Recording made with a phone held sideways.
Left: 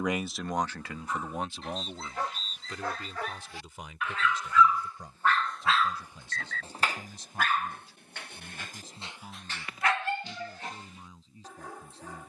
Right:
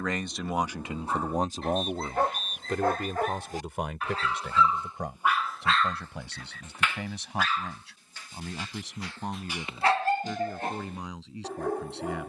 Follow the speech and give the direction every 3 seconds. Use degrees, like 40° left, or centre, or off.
30° right, 70° right, 80° right, 80° right.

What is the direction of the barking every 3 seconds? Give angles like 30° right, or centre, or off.
60° right, 30° right, 50° left, 40° right.